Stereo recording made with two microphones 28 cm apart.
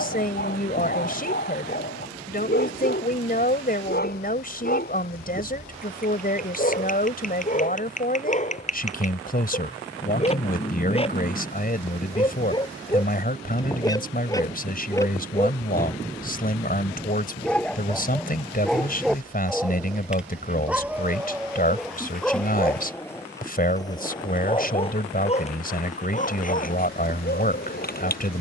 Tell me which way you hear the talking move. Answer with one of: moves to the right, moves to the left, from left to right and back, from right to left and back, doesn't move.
doesn't move.